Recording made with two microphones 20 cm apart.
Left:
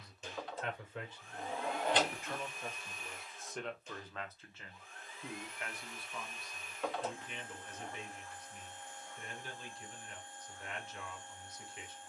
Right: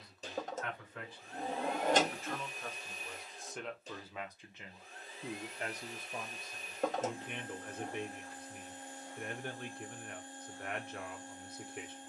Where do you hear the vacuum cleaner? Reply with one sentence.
You can hear the vacuum cleaner on the right.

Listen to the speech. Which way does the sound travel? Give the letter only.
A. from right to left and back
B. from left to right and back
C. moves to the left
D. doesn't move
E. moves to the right
E.